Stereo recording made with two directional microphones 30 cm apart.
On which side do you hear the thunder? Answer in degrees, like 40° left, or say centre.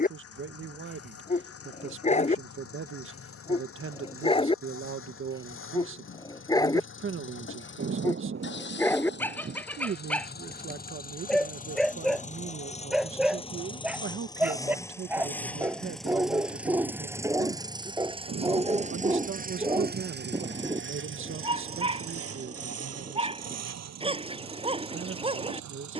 40° right.